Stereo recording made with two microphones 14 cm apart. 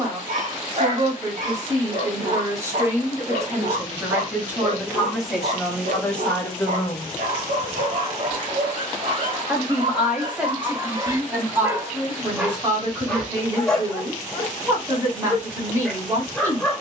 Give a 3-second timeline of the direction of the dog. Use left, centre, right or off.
right, right, right, right, centre, centre.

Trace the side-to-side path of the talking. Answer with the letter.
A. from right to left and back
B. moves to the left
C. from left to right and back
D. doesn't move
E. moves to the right
A.